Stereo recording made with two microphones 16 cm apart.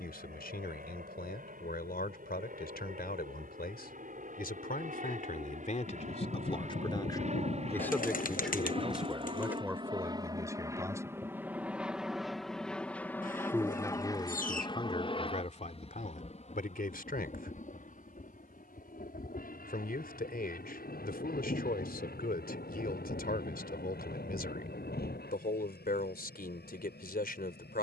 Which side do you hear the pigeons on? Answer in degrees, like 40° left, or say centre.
60° left.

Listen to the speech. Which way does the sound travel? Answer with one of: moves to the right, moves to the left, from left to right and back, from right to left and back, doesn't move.
from left to right and back.